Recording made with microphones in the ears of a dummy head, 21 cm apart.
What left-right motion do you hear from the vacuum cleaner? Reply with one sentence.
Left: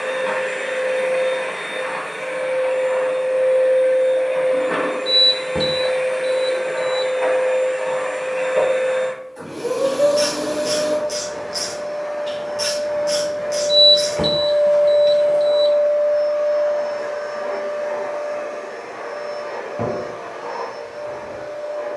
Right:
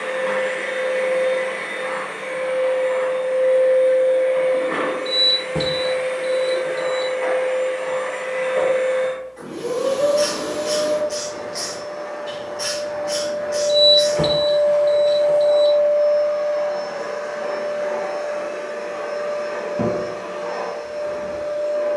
In this clip you hear the vacuum cleaner go from the left side to the right.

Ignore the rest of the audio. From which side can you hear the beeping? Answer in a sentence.
You can hear the beeping in the centre.